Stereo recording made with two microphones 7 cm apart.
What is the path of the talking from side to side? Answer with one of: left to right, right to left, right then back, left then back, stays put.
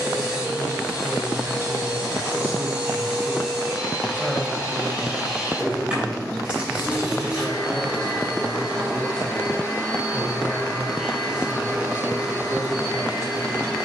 left then back.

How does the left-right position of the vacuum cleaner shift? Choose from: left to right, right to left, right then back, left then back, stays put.
stays put.